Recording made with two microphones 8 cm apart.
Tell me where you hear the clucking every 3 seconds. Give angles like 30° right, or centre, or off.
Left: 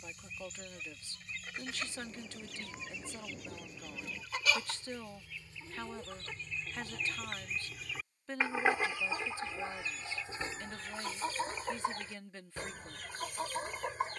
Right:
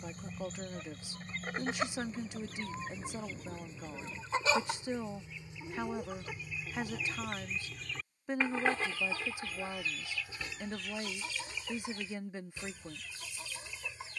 40° right, 30° right, centre, 30° left, 50° left.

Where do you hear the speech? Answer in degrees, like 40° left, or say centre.
20° right.